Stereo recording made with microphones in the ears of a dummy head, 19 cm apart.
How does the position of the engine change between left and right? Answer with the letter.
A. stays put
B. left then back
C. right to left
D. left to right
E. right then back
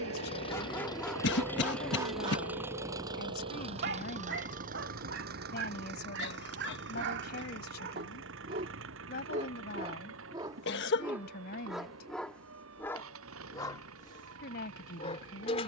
D.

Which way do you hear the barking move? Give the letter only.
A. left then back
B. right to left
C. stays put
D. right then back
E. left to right
D.